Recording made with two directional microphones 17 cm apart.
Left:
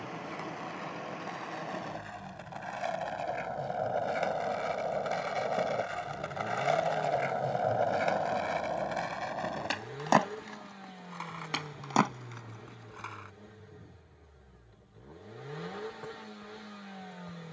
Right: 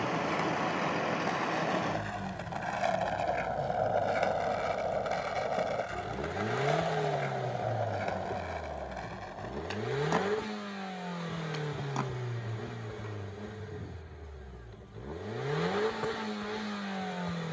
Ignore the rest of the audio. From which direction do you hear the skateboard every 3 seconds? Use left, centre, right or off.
right, centre, left, left, left, off.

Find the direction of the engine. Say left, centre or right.
right.